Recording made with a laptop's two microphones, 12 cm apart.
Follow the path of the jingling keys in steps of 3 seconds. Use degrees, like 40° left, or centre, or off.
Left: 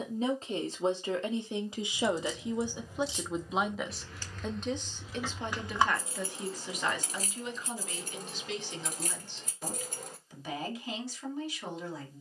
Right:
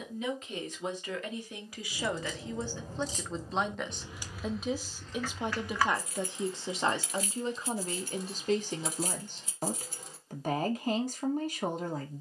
50° right, 10° right, 40° left, 50° left.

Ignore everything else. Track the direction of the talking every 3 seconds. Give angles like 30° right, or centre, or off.
20° left, 10° right, 40° right, 50° right.